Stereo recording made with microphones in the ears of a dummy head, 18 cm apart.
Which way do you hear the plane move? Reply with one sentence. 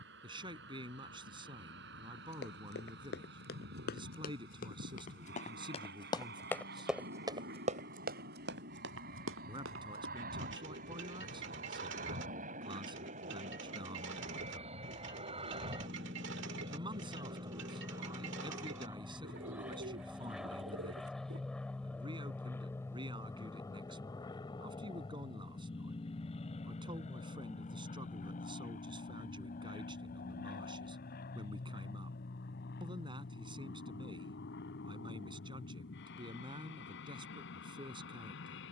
In this clip you hear the plane travel towards the left.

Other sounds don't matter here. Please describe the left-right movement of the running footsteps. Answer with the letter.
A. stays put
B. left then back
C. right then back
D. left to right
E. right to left
D.